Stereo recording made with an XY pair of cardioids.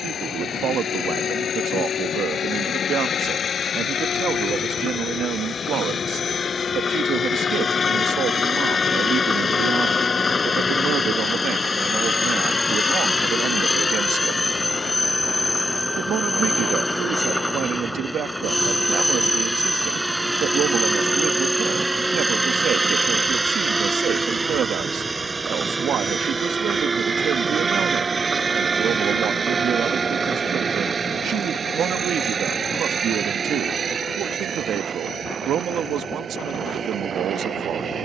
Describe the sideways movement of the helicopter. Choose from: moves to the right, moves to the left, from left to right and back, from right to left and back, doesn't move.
moves to the right.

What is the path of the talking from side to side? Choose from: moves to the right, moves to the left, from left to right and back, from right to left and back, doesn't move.
doesn't move.